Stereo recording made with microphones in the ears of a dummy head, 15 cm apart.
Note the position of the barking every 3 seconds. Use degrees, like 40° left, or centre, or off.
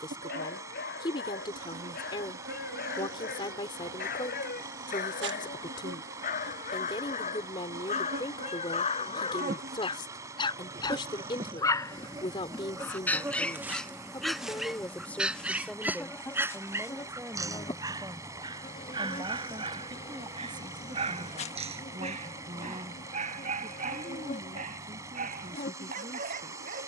60° left, 60° left, 40° left, 30° left, 10° left, 20° right, 30° right, 40° right, 50° right.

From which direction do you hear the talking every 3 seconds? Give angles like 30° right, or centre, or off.
30° left, 30° left, 30° left, 30° left, 20° left, centre, 20° right, 30° right, 40° right.